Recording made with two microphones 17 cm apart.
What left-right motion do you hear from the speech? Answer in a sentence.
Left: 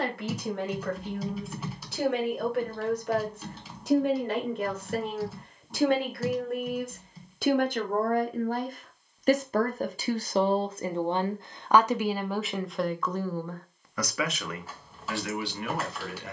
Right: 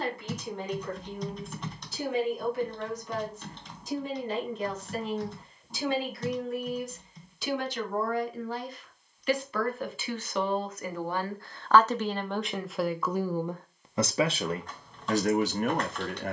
In this clip you hear the speech move to the right.